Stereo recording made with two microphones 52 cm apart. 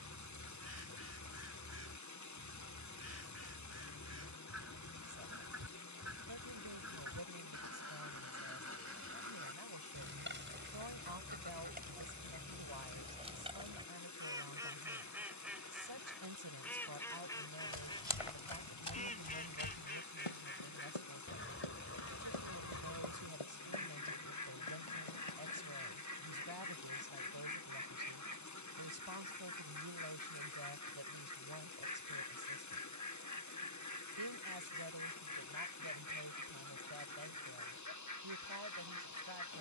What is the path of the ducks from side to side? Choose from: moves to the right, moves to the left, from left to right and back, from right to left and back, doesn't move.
moves to the left.